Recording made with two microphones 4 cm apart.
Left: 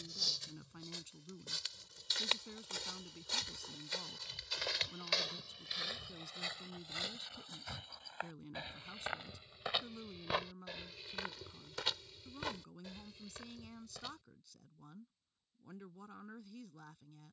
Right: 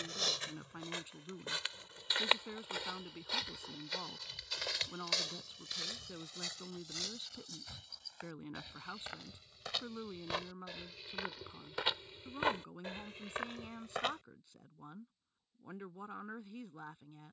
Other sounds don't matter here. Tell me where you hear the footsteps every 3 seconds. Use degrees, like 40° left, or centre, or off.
40° right, centre, 30° left, 10° left, 50° right, off.